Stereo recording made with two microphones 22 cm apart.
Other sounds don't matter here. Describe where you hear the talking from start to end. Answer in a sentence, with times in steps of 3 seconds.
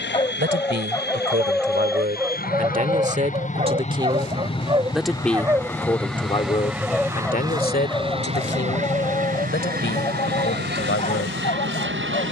You can hear the talking on the right from 0 s, in the centre from 3 s and on the left from 6 s.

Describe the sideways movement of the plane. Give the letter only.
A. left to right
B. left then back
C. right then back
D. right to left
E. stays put
A.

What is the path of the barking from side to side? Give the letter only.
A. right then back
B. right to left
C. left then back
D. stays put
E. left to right
A.